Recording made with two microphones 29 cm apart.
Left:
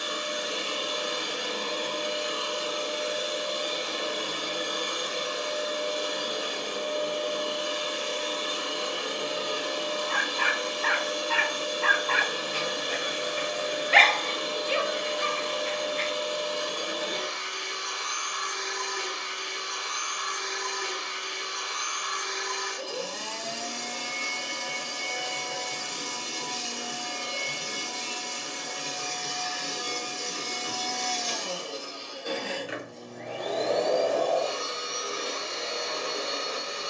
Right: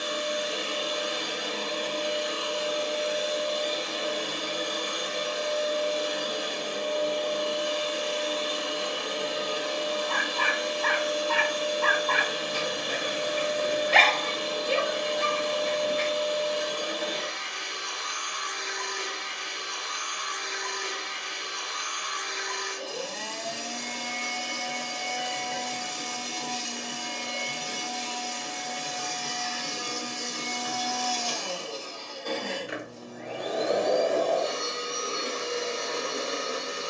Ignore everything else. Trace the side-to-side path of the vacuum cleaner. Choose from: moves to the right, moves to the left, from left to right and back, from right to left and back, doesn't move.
moves to the right.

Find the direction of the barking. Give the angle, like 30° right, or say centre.
50° right.